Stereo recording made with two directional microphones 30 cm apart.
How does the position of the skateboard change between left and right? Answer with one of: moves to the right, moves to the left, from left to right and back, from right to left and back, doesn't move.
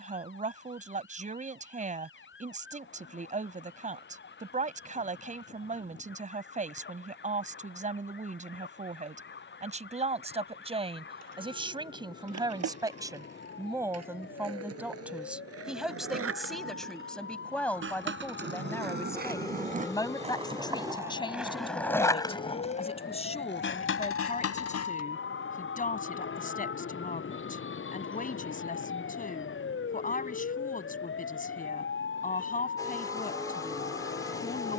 moves to the left.